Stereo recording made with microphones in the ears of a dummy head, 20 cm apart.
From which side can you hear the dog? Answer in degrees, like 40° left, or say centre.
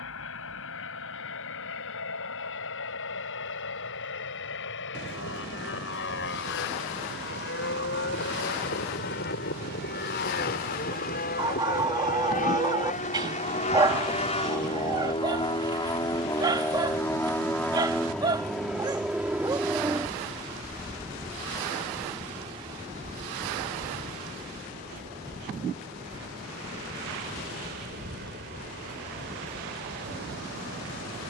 20° right.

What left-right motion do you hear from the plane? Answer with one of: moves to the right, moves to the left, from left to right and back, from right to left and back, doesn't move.
moves to the right.